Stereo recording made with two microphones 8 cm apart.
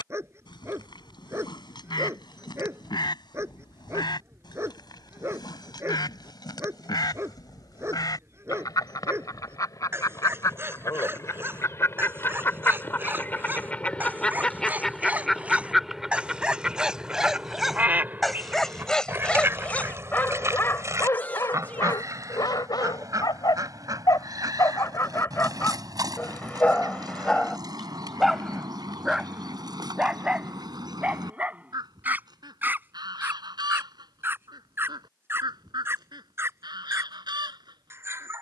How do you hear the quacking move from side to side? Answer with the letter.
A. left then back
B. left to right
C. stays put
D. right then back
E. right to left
B.